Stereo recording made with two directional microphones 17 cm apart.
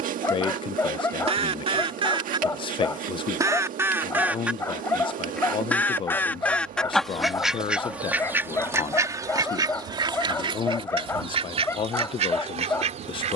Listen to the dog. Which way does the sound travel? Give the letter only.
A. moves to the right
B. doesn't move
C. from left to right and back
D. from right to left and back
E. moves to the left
B.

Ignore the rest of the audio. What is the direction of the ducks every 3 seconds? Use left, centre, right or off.
right, centre, centre, right, right.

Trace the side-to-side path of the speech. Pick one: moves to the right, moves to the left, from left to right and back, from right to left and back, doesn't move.
doesn't move.